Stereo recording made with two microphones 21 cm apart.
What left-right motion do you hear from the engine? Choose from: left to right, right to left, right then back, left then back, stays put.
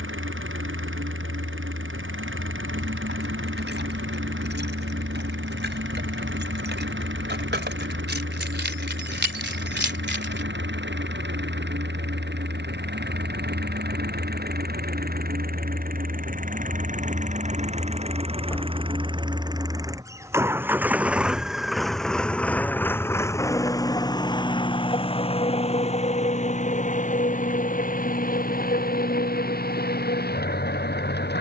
right to left.